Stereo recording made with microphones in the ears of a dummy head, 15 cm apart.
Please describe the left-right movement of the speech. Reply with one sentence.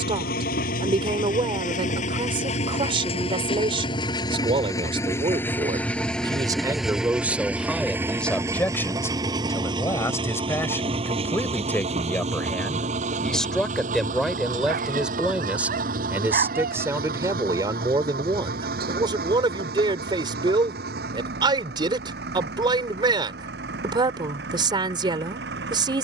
In this clip you hear the speech move from right to left and back again.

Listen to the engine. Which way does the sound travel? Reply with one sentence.
In this clip you hear the engine move from left to right.